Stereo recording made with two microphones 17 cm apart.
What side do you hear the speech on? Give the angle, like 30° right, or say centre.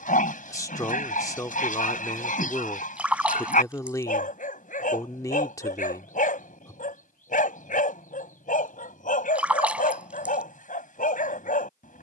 20° left.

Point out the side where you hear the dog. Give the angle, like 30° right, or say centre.
50° left.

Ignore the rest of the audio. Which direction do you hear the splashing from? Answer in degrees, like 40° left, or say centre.
10° right.